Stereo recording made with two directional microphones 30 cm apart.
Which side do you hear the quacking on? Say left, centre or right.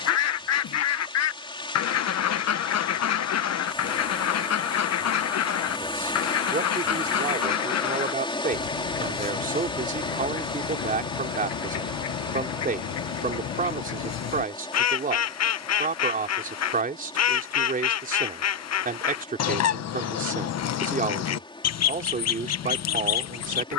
left.